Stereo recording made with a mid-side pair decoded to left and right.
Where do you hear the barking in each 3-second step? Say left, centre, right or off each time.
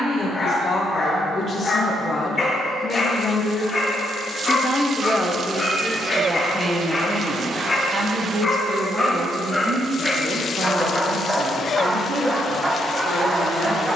left, left, left, centre, right.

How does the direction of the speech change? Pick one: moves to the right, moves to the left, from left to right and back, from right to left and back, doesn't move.
moves to the right.